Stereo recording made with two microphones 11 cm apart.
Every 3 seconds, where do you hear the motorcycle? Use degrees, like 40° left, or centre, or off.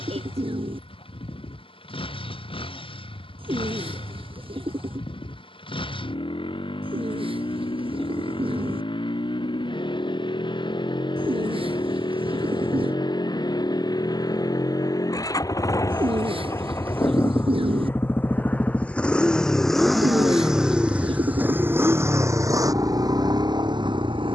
60° left, 50° left, 50° left, 50° left, 40° left, 30° left, centre, 30° right.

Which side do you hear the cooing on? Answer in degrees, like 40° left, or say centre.
60° right.